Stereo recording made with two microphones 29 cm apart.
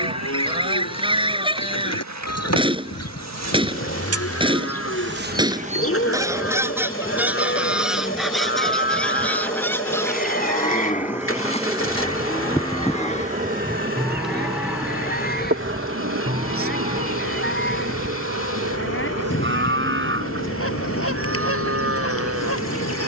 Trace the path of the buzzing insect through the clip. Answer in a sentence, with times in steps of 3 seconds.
You can hear the buzzing insect on the right from 0 s, in the centre from 6 s and on the right from 12 s.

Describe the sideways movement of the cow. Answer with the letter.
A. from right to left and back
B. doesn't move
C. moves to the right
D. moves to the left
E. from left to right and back
C.